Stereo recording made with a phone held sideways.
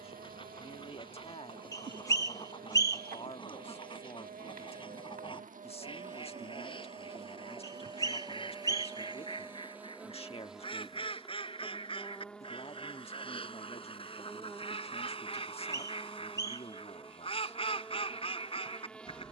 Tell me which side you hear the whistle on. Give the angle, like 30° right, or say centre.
20° left.